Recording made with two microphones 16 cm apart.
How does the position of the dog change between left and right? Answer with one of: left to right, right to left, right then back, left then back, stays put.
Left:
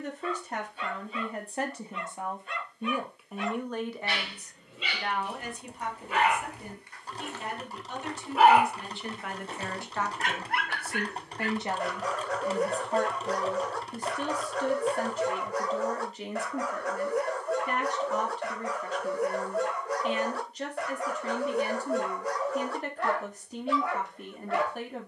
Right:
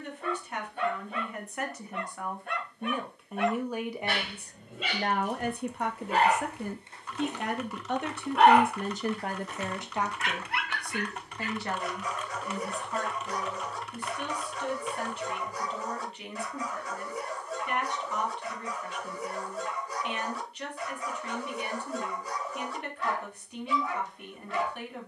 right to left.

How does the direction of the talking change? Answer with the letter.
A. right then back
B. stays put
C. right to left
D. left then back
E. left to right
A.